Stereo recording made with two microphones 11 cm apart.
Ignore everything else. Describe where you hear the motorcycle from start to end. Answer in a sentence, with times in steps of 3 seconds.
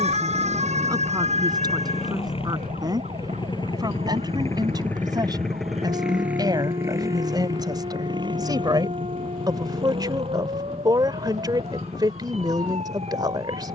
In this clip you hear the motorcycle on the left from 0 s and on the right from 6 s.